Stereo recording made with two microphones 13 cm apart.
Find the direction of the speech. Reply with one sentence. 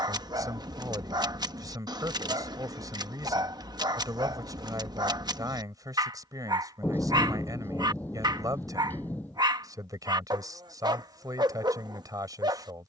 In this clip you hear the speech on the right.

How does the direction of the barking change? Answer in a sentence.
In this clip you hear the barking stay put.